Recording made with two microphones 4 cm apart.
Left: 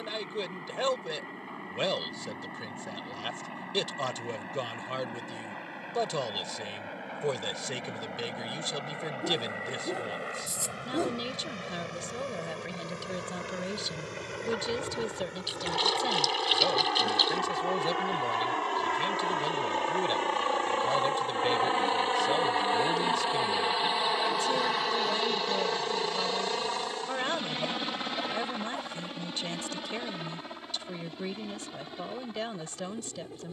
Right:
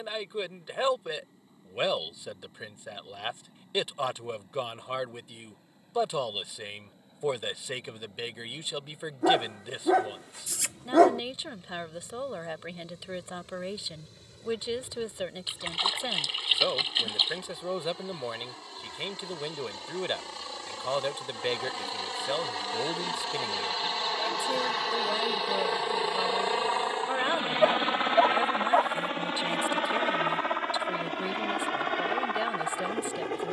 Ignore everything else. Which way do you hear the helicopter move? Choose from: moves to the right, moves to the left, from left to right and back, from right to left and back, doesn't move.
moves to the right.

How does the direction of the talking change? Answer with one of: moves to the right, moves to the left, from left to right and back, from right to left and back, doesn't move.
doesn't move.